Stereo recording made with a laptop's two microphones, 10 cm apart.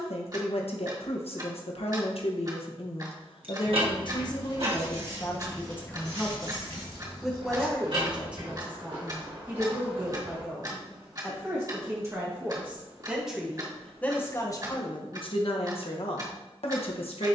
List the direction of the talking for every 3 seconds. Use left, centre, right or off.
left, left, centre, right, centre, left.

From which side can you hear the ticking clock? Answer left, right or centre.
right.